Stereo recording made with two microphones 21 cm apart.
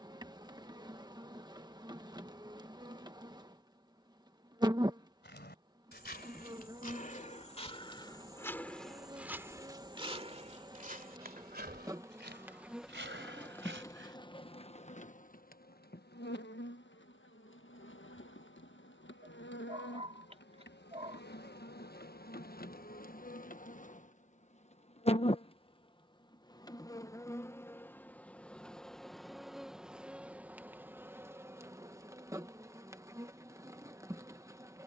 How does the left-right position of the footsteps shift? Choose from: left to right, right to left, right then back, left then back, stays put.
left to right.